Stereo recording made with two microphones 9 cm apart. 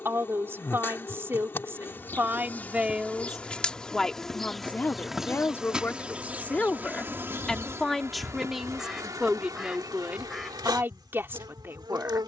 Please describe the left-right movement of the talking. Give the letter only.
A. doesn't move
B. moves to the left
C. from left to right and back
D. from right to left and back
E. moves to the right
D.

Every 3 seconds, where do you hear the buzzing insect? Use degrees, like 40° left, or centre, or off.
30° left, centre, 30° right, 50° right.